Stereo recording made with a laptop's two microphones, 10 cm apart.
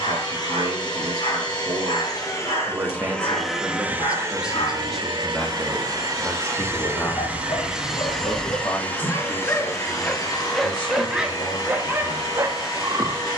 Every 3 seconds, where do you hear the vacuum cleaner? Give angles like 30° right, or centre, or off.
40° left, 30° right, 10° right, 30° left, 40° left.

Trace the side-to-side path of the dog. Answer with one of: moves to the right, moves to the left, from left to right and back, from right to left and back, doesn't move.
moves to the right.